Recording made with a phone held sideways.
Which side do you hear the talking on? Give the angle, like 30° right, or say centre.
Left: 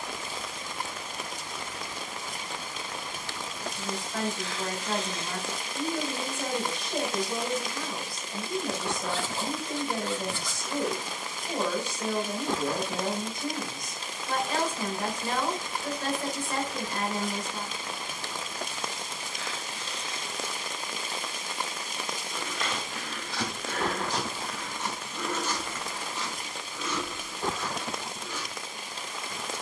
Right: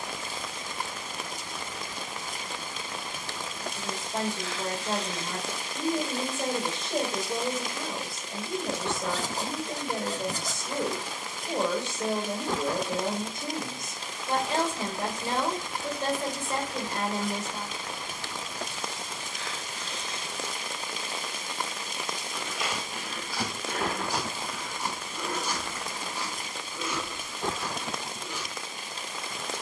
30° right.